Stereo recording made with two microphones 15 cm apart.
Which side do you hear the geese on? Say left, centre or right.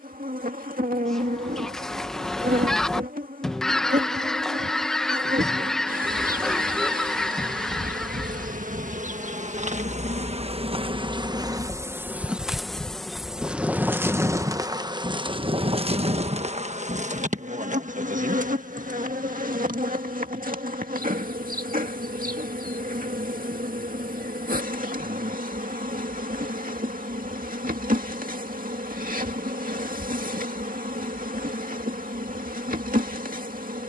centre.